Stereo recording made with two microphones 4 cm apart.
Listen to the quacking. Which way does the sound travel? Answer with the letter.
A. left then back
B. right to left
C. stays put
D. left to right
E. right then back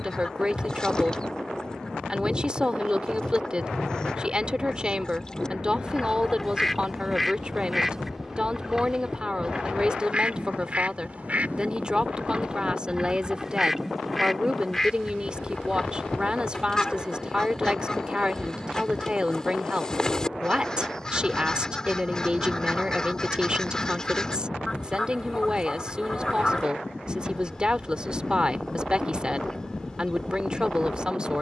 E.